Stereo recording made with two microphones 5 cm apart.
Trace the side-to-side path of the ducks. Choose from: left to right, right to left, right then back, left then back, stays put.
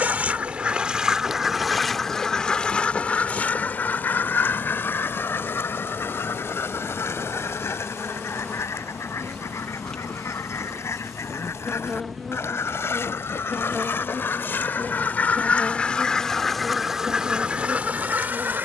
left then back.